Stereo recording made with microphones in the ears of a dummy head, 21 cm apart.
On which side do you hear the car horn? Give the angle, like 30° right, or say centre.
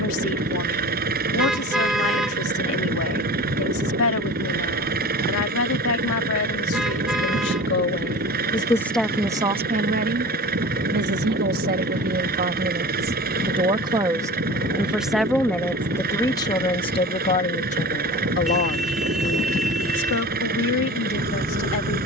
centre.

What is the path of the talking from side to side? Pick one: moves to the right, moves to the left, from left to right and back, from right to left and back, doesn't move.
from left to right and back.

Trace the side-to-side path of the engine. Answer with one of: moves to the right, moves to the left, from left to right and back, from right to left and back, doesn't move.
doesn't move.